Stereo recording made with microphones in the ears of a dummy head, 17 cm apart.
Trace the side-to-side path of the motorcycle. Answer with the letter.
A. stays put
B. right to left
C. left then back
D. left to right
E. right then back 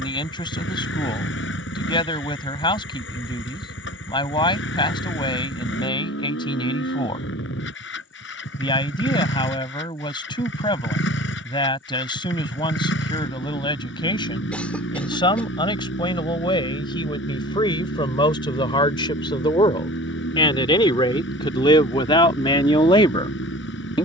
A.